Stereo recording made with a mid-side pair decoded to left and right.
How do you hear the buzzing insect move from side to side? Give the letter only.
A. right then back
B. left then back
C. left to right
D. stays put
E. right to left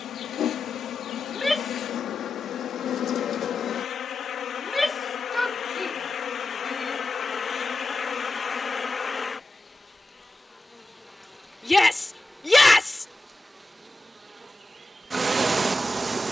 C.